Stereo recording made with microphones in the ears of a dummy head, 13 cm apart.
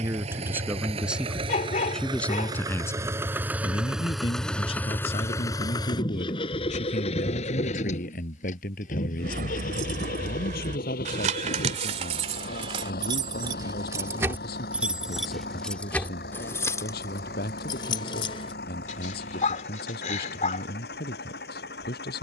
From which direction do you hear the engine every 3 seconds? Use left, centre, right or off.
right, centre, left, left, left, left, left, left.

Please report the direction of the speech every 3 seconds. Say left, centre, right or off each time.
centre, left, left, left, left, left, left, left.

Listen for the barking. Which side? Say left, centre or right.
left.